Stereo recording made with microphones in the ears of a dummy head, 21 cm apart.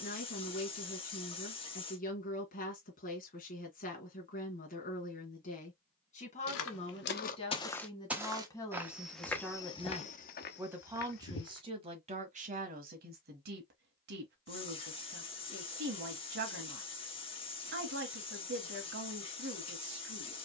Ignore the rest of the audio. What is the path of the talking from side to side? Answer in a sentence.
In this clip you hear the talking move from left to right.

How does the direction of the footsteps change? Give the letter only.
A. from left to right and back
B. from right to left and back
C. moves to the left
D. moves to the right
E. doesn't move
A.